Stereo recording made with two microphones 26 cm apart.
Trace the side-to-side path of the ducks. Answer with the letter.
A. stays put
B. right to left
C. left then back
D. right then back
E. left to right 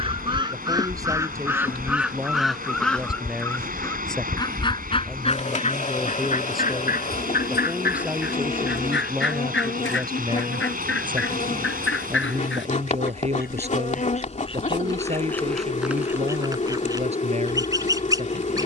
C.